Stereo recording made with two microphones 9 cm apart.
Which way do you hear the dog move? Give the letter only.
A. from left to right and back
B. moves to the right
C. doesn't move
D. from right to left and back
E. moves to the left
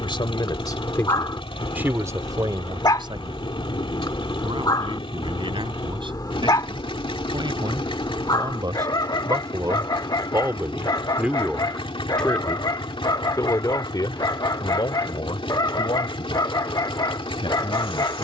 C.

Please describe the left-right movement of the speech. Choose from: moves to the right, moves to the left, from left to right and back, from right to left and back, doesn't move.
from left to right and back.